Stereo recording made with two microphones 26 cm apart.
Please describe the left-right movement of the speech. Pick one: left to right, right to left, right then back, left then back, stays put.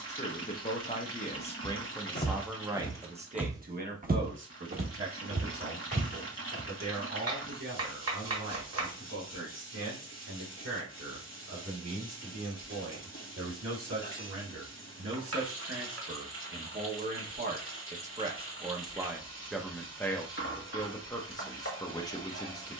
right then back.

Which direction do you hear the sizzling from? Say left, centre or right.
left.